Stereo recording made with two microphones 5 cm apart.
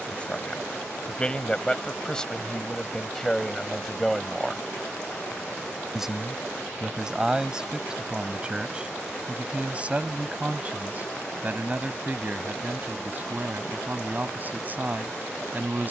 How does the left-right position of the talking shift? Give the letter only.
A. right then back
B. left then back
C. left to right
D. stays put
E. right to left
C.